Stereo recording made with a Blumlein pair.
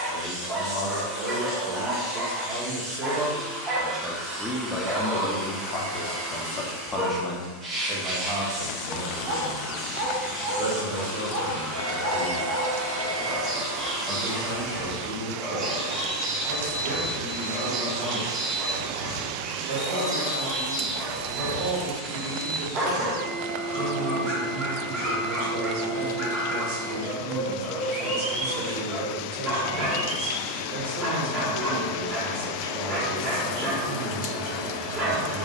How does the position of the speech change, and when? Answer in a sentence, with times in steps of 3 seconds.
In this clip you hear the speech on the right from 0 s, in the centre from 3 s and on the right from 9 s.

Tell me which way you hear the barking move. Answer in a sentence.
You can hear the barking stay put.